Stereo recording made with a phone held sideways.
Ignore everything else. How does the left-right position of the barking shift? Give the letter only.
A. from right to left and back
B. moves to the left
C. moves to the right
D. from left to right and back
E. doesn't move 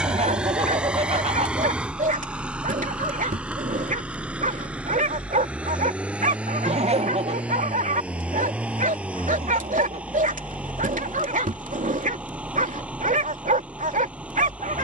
E.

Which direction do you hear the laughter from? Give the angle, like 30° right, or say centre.
40° right.